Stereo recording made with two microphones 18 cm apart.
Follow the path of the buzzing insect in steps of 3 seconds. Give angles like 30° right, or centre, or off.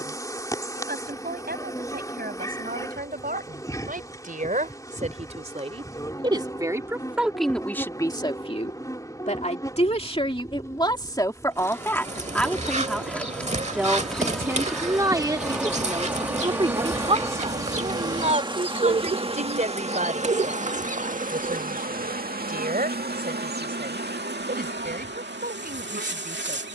20° left, 20° left, 20° left, 20° left, 10° left, 10° right, 30° right, 50° right, 70° right.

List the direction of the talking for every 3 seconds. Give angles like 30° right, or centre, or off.
60° right, 40° right, centre, 30° left, centre, 30° right, 40° right, 50° right, 50° right.